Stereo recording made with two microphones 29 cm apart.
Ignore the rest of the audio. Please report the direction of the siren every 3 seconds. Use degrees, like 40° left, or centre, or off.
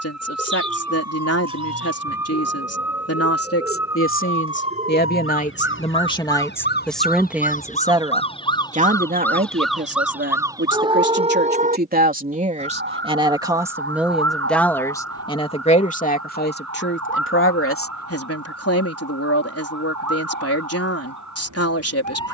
60° left, 50° left, 30° left, 10° right, 40° right, 60° right, 70° right, 70° right.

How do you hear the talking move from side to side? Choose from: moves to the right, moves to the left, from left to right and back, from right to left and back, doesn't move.
from left to right and back.